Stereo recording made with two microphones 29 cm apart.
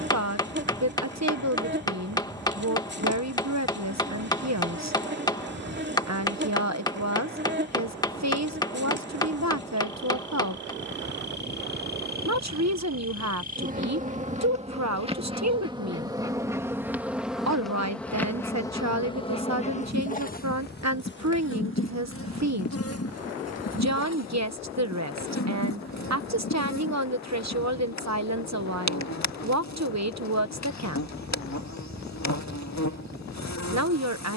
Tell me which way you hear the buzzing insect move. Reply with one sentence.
You can hear the buzzing insect move to the left.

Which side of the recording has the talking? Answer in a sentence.
In this clip you hear the talking on the right.